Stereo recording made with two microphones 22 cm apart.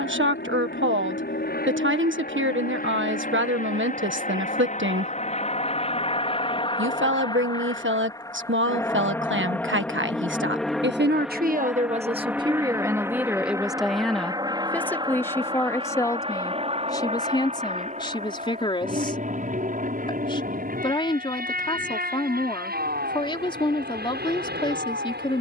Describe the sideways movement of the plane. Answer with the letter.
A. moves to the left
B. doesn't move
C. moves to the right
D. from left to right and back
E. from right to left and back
C.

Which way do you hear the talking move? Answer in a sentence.
You can hear the talking move to the left.